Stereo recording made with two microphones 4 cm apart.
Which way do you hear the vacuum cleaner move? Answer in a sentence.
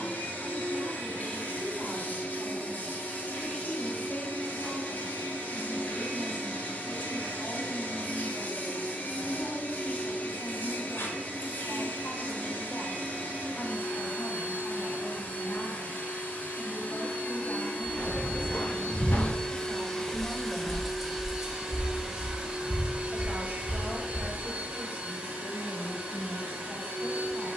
In this clip you hear the vacuum cleaner travel towards the right.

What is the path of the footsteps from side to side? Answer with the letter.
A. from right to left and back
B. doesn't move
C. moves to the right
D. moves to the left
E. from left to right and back
C.